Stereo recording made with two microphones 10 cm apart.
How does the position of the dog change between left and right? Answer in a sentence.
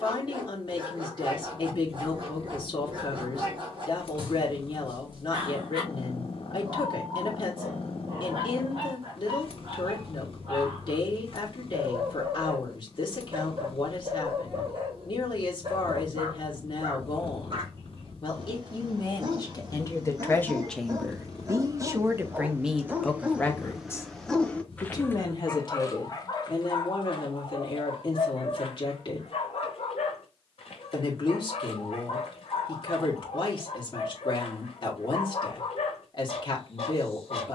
You can hear the dog move from right to left.